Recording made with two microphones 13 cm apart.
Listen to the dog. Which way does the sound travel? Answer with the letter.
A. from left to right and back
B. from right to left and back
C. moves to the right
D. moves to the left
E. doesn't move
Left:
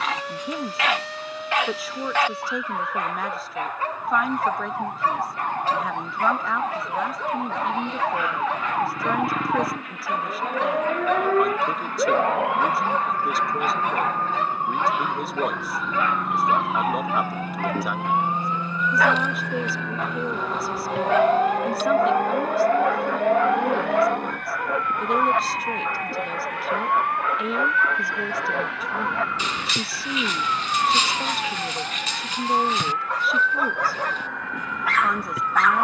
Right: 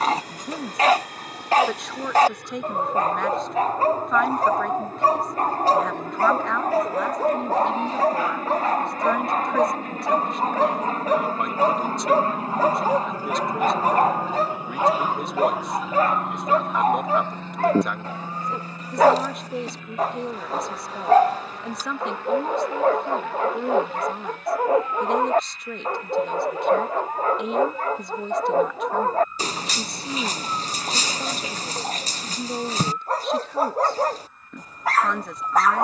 E.